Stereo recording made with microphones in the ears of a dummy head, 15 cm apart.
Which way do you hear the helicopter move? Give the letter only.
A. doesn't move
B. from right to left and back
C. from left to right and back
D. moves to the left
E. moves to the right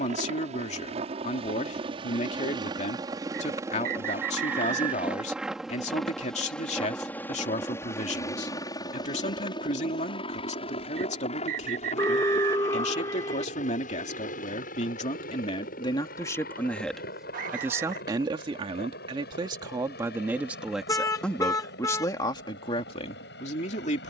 D.